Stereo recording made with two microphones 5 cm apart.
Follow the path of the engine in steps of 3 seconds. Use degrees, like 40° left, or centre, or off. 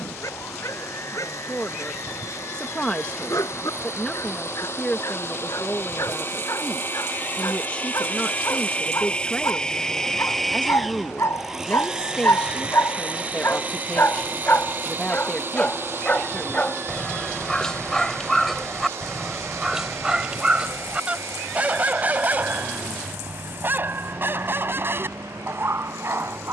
60° left, 50° left, 40° left, centre, 30° right, 50° right, 60° right, 60° right, 70° right.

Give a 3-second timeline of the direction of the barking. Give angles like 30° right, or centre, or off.
80° left, 70° left, 70° left, 60° left, 50° left, 20° left, 10° right, 30° right, 50° right.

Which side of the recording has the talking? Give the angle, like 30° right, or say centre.
20° left.